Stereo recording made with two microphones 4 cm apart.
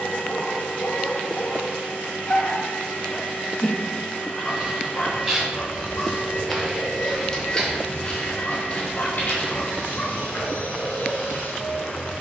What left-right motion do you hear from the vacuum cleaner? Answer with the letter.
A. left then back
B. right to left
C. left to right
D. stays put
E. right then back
D.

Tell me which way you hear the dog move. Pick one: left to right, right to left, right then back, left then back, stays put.
stays put.